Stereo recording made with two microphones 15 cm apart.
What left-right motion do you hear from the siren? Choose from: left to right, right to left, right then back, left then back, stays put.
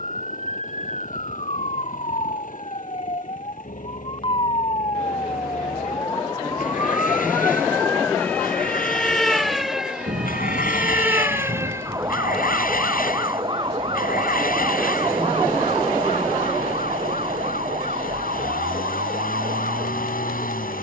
left to right.